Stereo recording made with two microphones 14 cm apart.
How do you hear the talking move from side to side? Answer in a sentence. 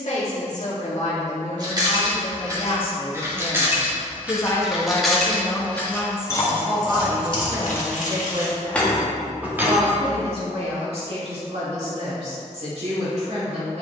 You can hear the talking move from left to right.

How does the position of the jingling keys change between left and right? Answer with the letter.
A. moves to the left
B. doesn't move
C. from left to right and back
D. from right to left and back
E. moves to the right
D.